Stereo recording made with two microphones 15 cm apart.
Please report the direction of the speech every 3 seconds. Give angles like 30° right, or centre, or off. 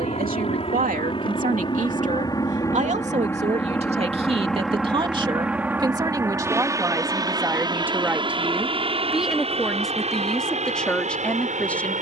60° right, 40° right, 10° right, centre.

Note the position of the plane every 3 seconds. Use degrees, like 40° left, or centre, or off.
30° left, centre, 20° right, 40° right.